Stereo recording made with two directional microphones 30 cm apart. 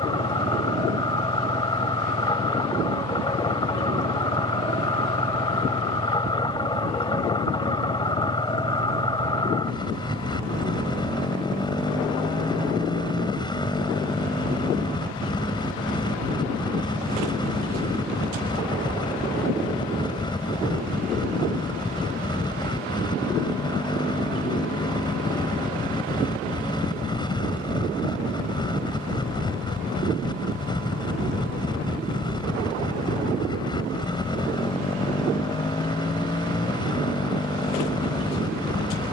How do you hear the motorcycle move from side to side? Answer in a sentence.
In this clip you hear the motorcycle stay put.